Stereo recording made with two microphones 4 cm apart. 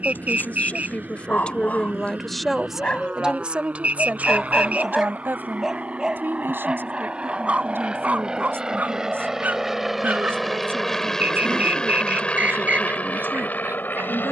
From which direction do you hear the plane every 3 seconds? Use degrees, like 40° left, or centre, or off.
50° right, 40° right, 30° right, centre, 40° left.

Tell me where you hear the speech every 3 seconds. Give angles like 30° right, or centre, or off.
30° left, 40° right, 70° right, 80° right, 80° right.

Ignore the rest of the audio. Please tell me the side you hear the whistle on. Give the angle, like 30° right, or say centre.
40° right.